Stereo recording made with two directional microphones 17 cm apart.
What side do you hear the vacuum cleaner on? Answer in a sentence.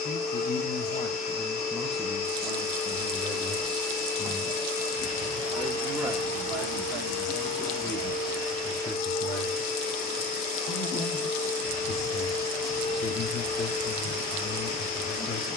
In this clip you hear the vacuum cleaner on the left.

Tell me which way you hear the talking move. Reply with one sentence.
You can hear the talking go right and come back.